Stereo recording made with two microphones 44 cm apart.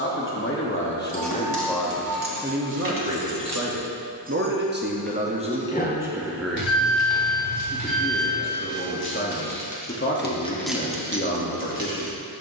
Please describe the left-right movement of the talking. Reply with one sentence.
In this clip you hear the talking move from left to right and back again.